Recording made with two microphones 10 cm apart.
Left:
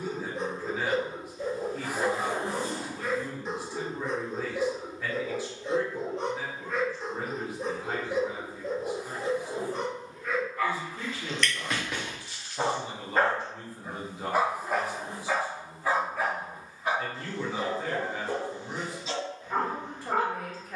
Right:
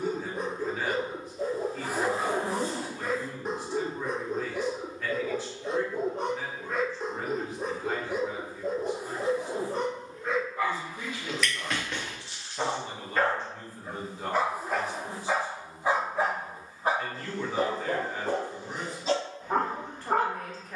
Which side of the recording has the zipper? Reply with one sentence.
You can hear the zipper on the right.